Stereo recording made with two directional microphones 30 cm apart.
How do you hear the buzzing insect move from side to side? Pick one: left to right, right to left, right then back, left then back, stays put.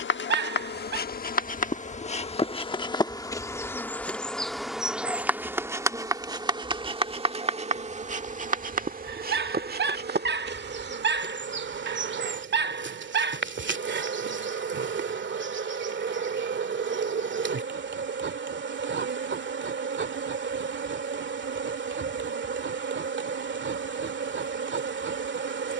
left to right.